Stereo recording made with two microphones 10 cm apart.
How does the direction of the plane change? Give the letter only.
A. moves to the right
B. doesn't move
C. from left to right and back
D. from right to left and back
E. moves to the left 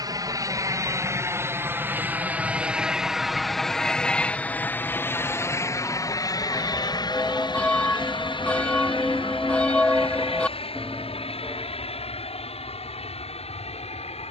E.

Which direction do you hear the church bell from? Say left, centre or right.
centre.